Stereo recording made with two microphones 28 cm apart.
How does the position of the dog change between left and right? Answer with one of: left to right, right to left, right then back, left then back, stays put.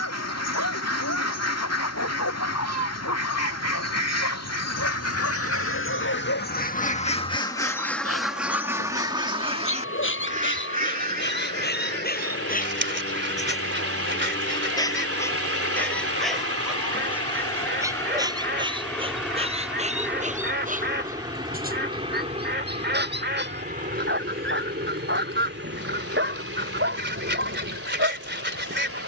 left to right.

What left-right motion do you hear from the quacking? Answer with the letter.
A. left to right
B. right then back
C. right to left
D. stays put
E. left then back
A.